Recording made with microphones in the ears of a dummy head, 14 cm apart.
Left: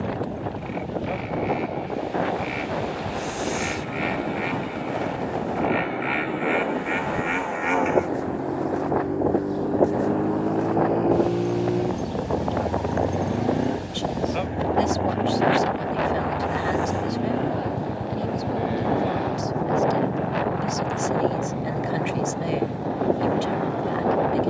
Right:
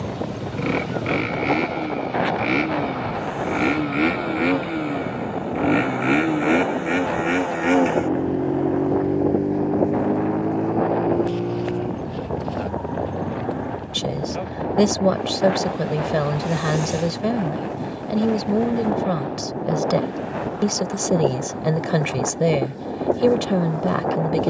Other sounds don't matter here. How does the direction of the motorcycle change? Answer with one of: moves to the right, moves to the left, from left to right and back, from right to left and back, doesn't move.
moves to the left.